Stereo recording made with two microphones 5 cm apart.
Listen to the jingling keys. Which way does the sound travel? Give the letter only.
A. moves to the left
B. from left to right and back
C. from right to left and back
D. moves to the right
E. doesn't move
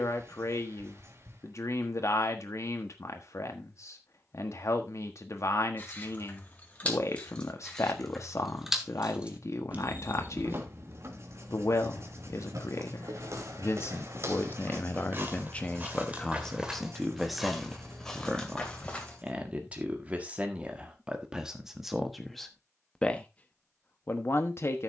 D.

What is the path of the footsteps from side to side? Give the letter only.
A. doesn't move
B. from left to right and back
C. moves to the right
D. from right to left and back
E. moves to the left
E.